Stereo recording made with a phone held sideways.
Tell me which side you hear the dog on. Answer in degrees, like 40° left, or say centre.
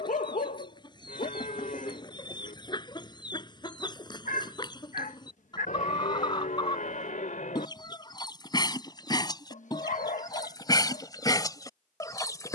60° left.